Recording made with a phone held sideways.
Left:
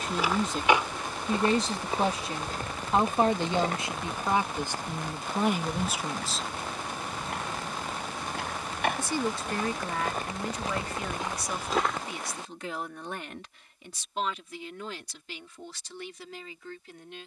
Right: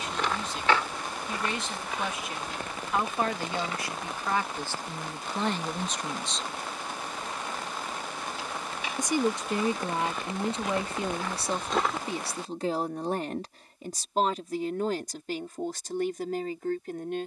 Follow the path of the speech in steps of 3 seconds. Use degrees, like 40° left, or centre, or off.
40° left, 20° left, centre, 30° right, 40° right, 50° right.